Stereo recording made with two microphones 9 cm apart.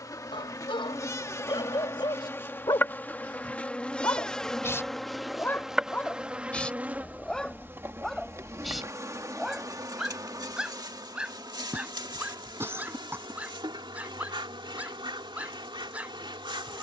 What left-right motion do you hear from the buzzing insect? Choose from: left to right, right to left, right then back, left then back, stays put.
left to right.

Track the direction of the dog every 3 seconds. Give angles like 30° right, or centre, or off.
60° left, 30° left, 10° left, 10° right, 10° right, 20° right.